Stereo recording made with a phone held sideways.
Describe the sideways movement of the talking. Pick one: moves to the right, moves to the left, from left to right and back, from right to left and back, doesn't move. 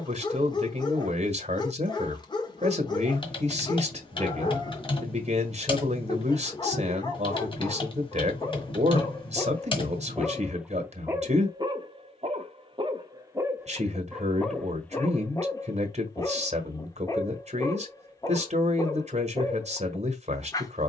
doesn't move.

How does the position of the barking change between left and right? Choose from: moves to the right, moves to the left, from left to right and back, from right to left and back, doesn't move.
from left to right and back.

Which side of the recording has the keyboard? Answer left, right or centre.
left.